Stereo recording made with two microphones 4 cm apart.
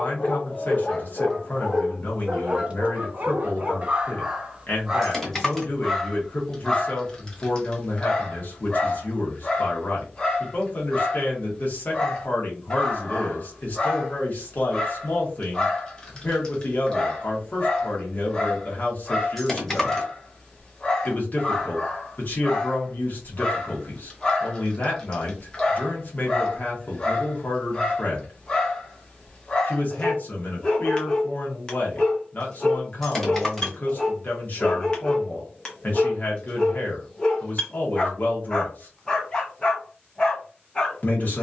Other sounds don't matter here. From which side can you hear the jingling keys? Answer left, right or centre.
centre.